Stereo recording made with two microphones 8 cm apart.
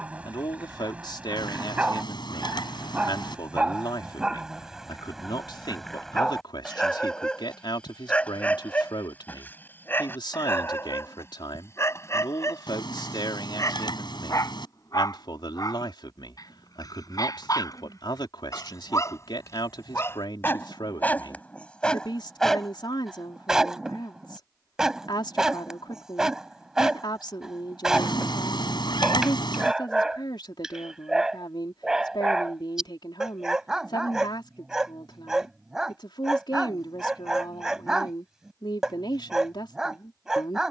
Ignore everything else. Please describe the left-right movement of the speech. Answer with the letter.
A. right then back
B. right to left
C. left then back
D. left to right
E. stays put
E.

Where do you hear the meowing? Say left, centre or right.
left.